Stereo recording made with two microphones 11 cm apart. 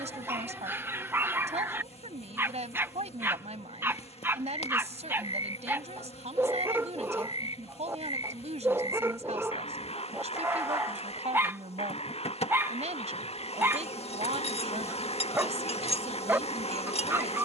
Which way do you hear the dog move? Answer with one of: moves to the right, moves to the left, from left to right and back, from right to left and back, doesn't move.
doesn't move.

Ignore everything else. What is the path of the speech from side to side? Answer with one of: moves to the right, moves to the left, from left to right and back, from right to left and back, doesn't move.
doesn't move.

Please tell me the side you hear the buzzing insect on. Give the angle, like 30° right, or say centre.
60° left.